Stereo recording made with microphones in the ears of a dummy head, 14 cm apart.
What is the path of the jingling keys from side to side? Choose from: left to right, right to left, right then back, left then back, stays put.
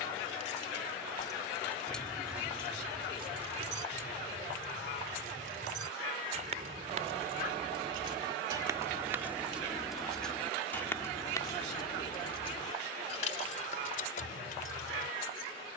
right then back.